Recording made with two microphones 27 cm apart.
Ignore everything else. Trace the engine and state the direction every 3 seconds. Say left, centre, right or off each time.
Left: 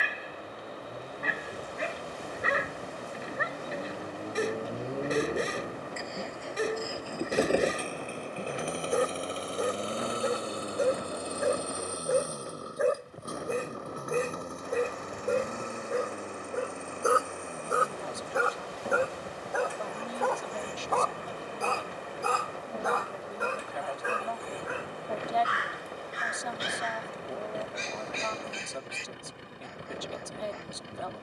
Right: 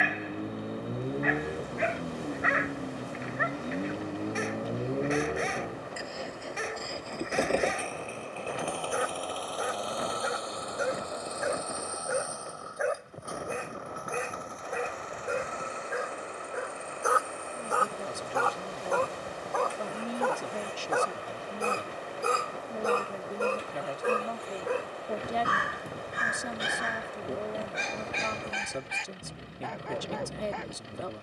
right, right, centre, left, left, left, left, left, left, left, left.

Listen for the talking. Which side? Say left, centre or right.
right.